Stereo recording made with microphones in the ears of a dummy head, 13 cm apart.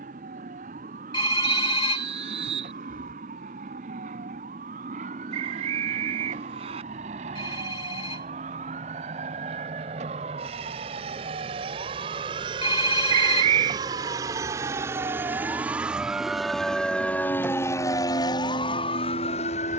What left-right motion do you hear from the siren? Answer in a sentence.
In this clip you hear the siren travel towards the left.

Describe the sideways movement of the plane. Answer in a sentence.
In this clip you hear the plane move from right to left.